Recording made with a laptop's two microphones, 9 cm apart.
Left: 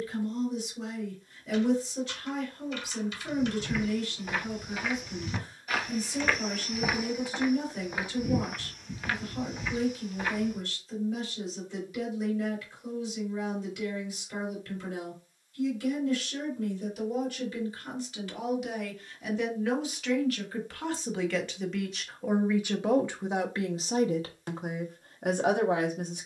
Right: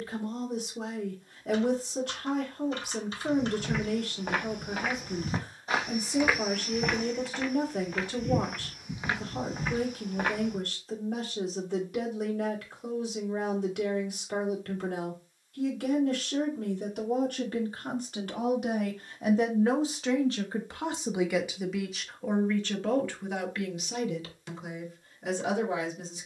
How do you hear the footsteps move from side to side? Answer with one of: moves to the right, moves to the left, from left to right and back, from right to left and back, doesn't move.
from right to left and back.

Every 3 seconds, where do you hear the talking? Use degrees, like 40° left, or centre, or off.
60° right, 60° right, 60° right, 60° right, 60° right, 50° right, 40° right, 10° left, 50° left.